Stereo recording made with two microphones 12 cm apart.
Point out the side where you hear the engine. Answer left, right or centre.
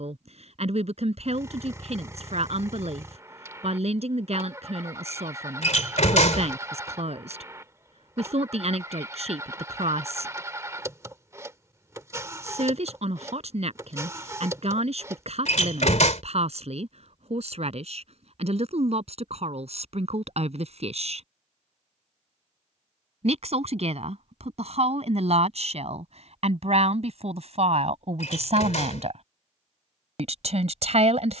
right.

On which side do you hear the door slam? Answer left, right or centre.
left.